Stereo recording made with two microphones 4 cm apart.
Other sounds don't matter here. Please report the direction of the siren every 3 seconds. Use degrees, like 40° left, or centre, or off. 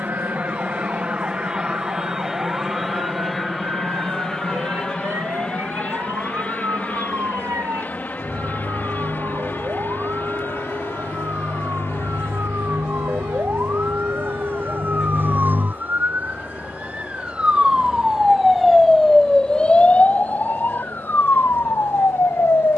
80° right, 80° right, 70° right, 70° right, 60° right, 40° right, 10° left, 50° left.